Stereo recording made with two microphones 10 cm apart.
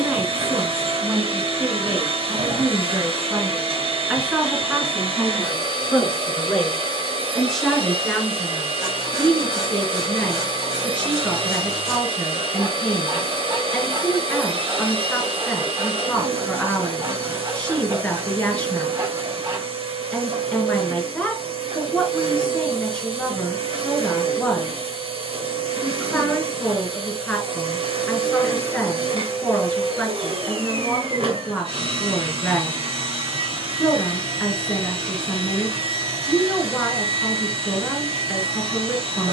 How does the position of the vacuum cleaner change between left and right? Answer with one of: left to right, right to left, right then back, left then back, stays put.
stays put.